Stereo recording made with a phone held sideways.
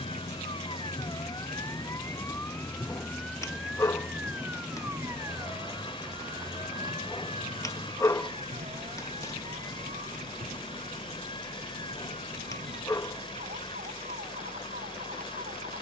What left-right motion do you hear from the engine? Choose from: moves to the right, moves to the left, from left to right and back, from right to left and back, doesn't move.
doesn't move.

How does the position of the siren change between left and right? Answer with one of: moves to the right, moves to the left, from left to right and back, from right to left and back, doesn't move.
moves to the right.